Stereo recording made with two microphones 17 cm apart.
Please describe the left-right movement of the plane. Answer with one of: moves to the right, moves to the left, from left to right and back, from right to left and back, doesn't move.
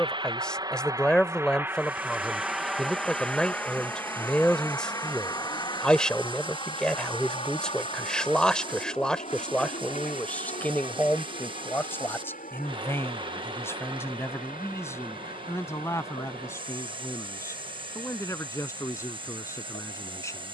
moves to the left.